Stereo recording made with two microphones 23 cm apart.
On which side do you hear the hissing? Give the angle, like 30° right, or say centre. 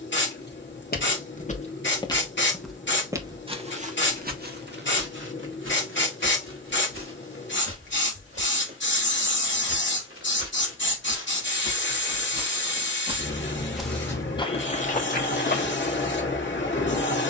50° left.